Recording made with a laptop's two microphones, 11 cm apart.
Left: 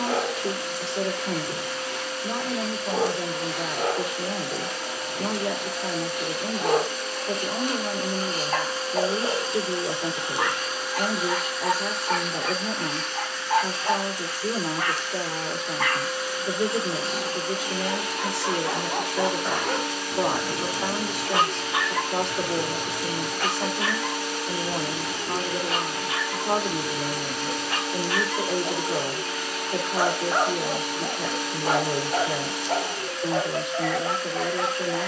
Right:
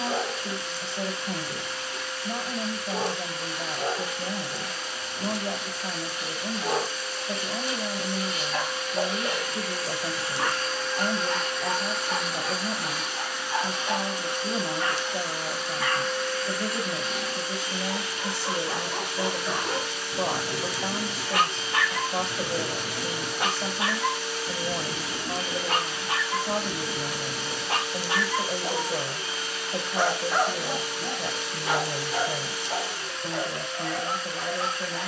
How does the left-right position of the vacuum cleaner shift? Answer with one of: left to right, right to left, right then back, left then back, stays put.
right then back.